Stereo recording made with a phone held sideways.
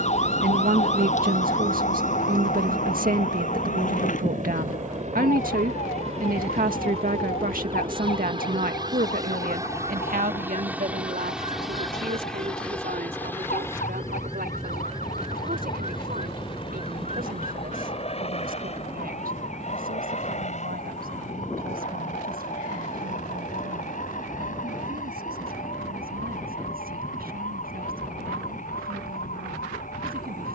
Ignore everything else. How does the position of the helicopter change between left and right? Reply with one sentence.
In this clip you hear the helicopter move from right to left.